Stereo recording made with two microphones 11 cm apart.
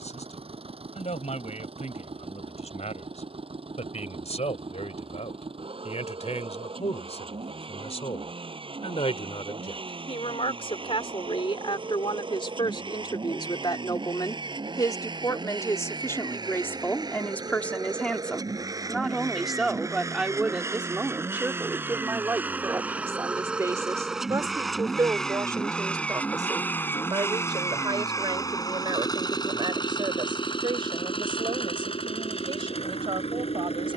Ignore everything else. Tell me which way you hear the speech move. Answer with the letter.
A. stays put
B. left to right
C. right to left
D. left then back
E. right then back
B.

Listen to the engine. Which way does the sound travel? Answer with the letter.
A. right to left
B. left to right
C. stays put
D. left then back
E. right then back
A.